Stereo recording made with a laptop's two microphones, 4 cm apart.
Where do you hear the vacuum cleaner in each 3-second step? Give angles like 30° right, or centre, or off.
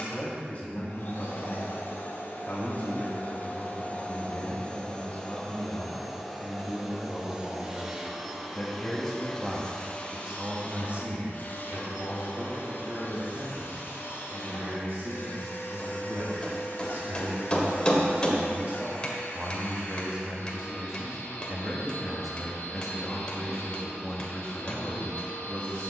60° left, 30° left, 10° right, 30° left, 60° left, 60° left, 60° left, 60° left, 60° left.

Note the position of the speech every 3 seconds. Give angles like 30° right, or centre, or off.
40° left, 40° left, 30° left, 20° right, 60° right, 60° right, 30° right, centre, 20° left.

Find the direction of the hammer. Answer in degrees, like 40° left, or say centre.
20° left.